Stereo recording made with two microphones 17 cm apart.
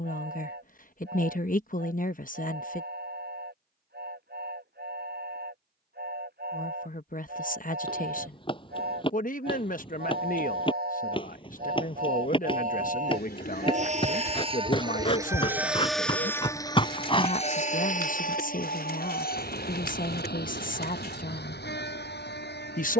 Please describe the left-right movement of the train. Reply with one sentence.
In this clip you hear the train travel towards the left.